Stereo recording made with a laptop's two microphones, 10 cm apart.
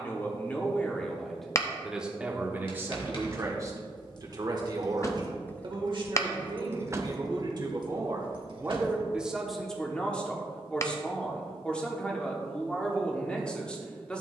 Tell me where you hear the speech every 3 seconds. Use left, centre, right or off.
centre, right, right, centre, centre.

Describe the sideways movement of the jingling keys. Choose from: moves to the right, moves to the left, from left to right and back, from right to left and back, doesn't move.
moves to the right.